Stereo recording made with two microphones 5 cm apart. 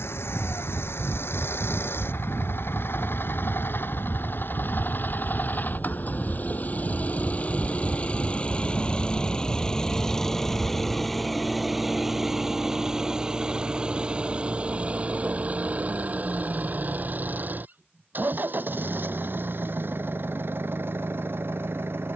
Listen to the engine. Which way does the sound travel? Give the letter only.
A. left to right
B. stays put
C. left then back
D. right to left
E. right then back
A.